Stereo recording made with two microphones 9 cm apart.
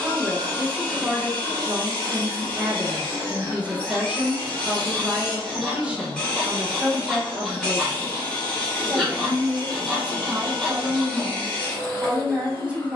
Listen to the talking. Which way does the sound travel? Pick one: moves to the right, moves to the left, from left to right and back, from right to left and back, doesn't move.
doesn't move.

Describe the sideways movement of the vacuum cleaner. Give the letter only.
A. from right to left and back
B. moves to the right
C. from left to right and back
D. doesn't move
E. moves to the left
D.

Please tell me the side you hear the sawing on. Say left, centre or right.
centre.